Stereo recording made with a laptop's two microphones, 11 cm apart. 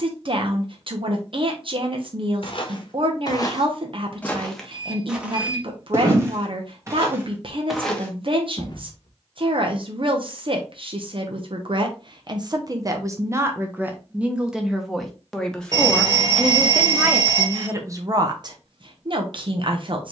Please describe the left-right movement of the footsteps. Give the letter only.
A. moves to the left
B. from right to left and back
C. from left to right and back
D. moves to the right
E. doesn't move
C.